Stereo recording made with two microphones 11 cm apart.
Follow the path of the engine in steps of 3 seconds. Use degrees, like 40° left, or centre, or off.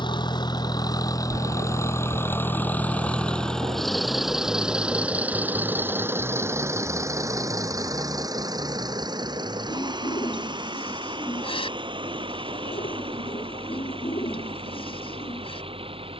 30° left, centre, 30° right, 40° right, 50° right, 60° right.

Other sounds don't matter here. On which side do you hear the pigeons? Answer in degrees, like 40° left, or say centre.
60° left.